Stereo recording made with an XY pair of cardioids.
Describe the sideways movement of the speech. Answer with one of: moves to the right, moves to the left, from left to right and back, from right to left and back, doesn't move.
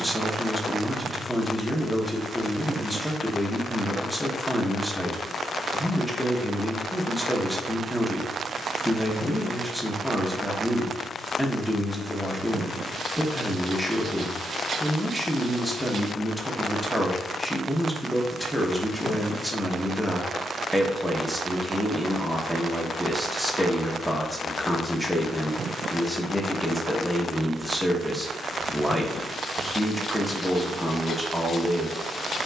doesn't move.